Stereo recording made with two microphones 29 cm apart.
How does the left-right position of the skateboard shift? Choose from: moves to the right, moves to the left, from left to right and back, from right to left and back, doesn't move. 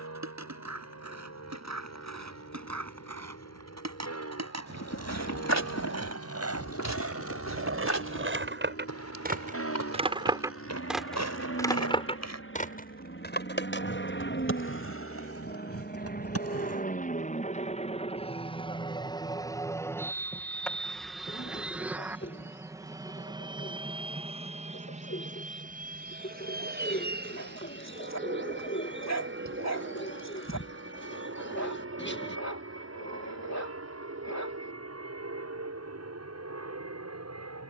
moves to the left.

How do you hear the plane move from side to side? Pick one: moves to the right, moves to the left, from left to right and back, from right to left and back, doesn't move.
moves to the right.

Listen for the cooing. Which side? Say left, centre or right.
left.